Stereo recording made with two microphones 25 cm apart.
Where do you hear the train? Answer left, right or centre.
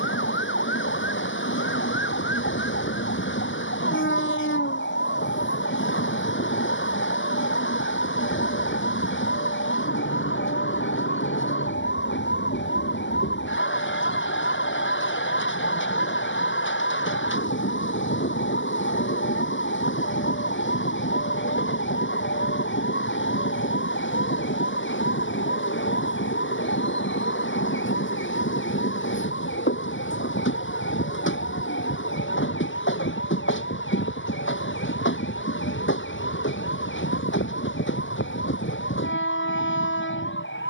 left.